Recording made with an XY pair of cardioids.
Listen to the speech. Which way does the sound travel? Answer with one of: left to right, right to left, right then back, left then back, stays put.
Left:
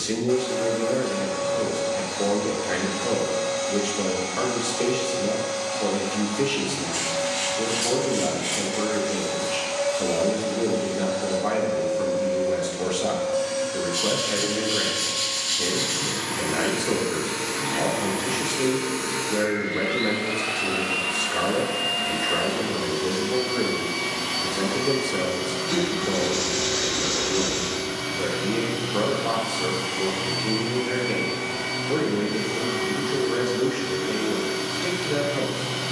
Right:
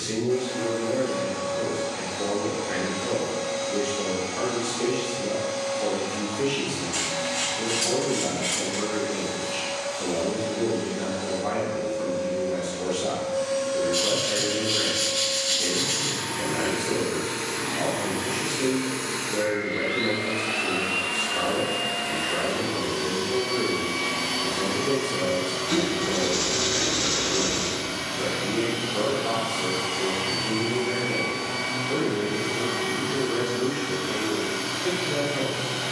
stays put.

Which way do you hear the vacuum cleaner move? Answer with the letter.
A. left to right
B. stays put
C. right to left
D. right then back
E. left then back
A.